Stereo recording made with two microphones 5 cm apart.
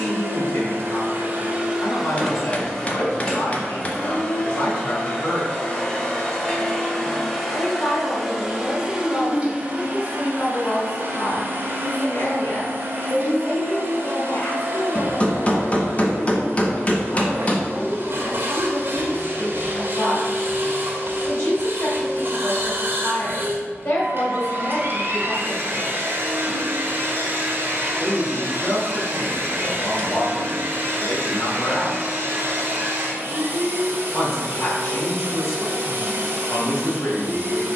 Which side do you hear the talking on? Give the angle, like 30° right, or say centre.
50° left.